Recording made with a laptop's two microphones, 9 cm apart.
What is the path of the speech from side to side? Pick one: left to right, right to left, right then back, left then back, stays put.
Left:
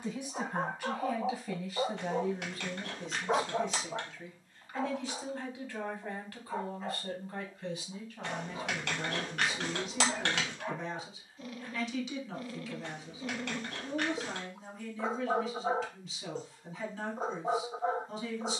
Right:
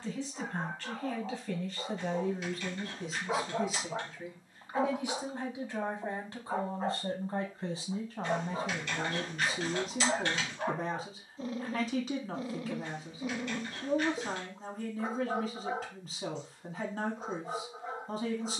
left to right.